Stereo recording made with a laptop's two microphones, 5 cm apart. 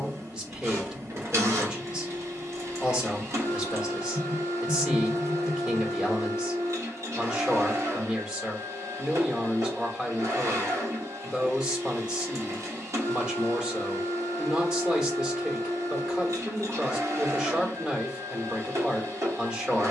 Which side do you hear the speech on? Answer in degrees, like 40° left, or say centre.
20° right.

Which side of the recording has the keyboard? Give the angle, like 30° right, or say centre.
60° right.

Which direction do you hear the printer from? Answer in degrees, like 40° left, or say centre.
70° right.